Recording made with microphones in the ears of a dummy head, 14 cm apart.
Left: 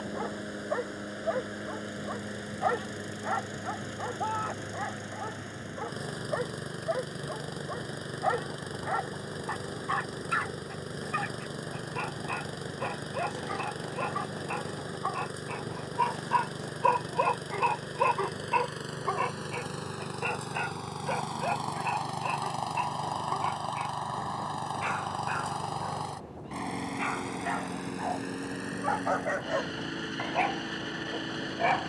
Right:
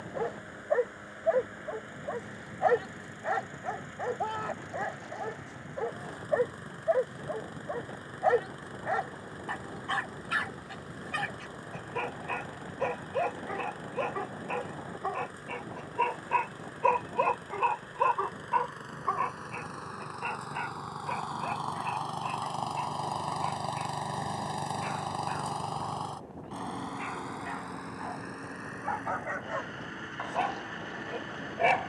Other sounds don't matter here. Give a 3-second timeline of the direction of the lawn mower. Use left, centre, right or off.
left, left, left, left, left, left, left, centre, centre, left, left.